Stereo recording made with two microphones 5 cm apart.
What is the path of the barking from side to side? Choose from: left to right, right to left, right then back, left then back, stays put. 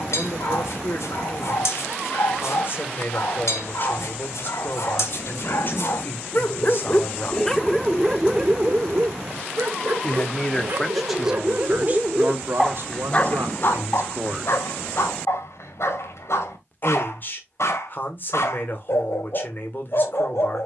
right then back.